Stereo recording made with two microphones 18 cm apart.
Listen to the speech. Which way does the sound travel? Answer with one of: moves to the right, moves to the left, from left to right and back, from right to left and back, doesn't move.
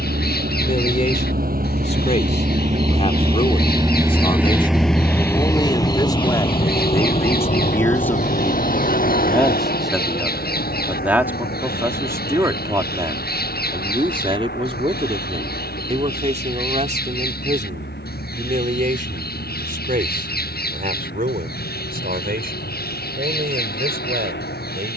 moves to the right.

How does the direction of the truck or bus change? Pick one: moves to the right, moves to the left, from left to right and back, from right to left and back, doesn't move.
moves to the left.